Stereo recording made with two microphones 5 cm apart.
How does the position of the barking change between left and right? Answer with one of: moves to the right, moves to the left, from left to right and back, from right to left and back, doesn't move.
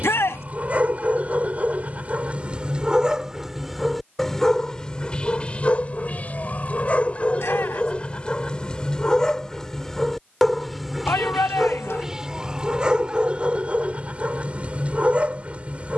from right to left and back.